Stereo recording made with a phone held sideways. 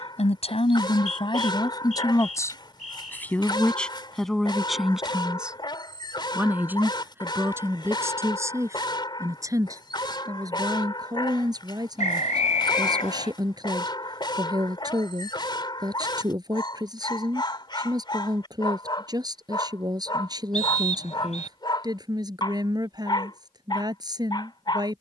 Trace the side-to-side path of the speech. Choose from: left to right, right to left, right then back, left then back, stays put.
left to right.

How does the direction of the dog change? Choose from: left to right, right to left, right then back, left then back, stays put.
stays put.